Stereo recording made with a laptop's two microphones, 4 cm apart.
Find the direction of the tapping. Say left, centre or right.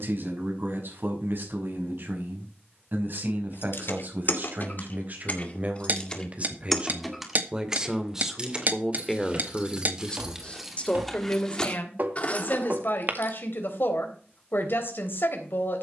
right.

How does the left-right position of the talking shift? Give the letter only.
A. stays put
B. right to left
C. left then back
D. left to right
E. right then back
B.